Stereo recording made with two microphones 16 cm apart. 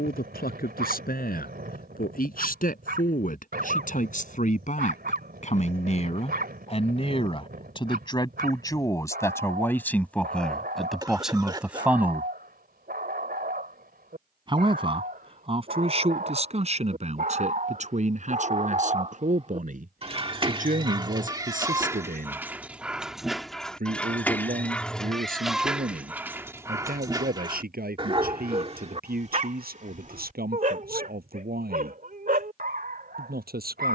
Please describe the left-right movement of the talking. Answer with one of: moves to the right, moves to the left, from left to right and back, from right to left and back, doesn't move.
moves to the right.